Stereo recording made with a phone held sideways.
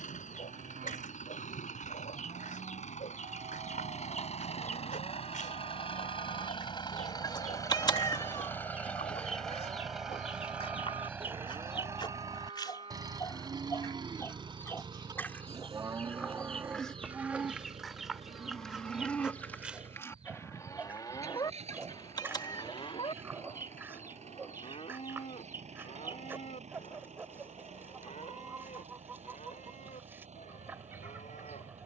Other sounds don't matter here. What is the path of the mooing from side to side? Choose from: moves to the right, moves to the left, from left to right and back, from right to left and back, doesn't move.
moves to the left.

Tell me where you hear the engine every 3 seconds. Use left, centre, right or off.
left, left, left, centre, right, right, right, right, right, right, right.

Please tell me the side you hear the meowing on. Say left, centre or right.
left.